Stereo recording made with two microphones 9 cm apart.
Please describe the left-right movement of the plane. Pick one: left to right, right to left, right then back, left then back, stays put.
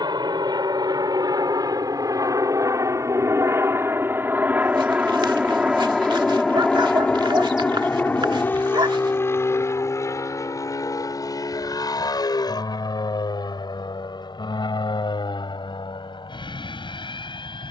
right to left.